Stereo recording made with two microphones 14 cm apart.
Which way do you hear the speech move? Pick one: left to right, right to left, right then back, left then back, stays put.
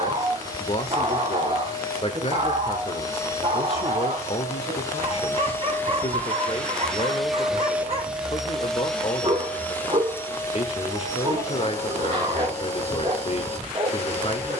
stays put.